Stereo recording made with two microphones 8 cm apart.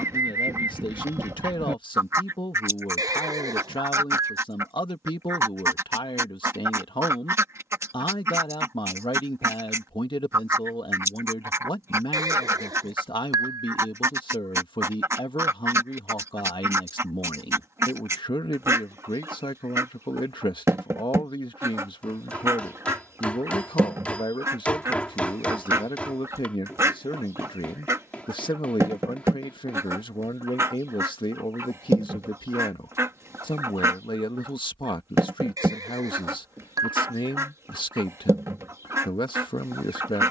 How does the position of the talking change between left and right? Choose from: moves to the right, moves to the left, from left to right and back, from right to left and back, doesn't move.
doesn't move.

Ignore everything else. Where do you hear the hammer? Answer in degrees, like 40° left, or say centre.
20° left.